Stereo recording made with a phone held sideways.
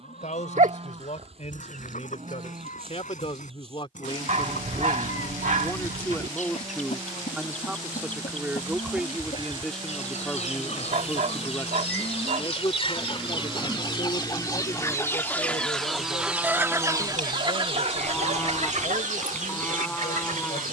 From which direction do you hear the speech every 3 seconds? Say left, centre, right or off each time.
left, left, centre, centre, left, left, left.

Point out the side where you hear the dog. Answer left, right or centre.
right.